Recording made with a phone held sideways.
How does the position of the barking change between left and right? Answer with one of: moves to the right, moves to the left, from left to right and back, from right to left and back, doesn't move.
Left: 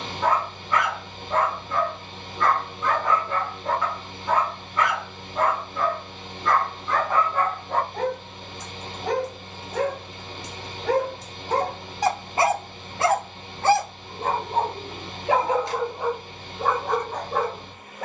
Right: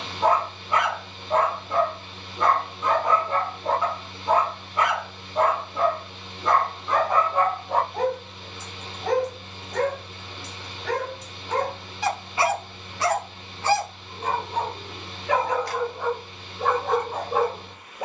from right to left and back.